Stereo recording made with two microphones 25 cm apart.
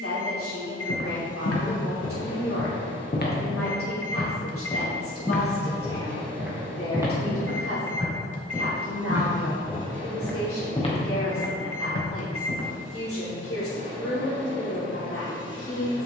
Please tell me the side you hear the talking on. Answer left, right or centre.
left.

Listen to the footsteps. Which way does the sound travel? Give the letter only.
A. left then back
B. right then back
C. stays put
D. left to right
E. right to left
B.